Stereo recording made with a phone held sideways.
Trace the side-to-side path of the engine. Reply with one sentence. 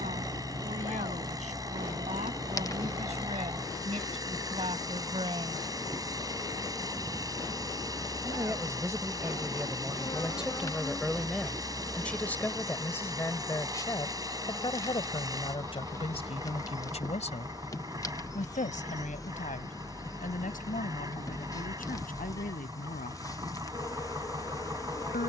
You can hear the engine stay put.